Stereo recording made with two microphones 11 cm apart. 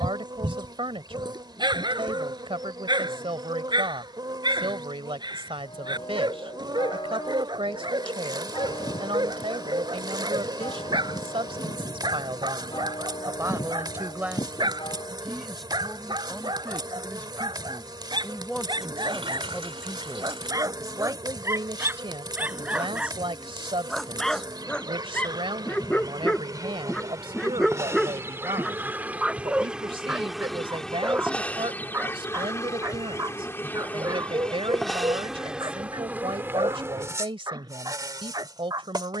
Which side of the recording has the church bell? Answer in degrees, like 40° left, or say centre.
50° left.